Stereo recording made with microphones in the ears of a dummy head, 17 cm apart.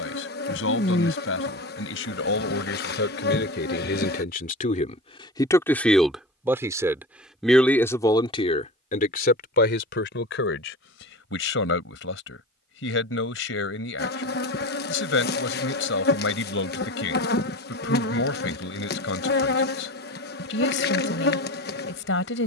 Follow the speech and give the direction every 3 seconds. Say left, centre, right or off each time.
left, left, centre, left, left, left, left, left.